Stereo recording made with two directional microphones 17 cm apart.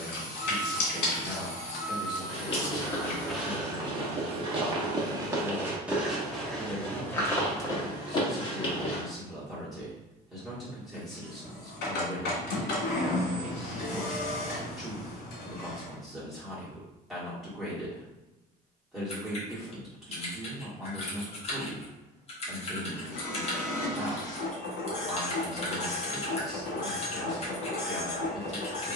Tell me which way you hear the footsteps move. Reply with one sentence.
In this clip you hear the footsteps move from left to right and back again.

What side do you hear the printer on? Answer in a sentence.
In this clip you hear the printer on the left.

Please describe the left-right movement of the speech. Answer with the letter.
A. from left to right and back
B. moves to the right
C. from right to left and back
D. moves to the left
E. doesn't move
E.